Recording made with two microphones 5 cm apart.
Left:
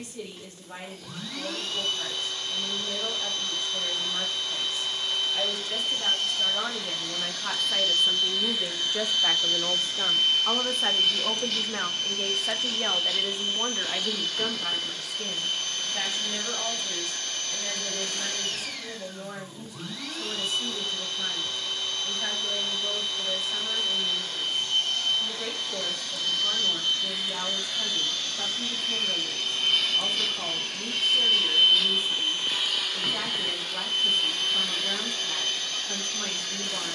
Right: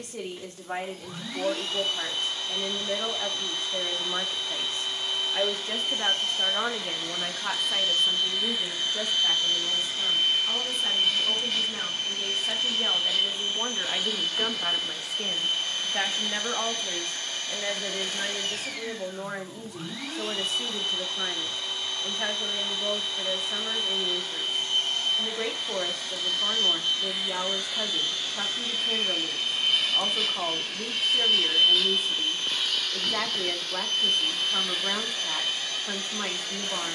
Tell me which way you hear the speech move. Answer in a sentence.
In this clip you hear the speech move from right to left and back again.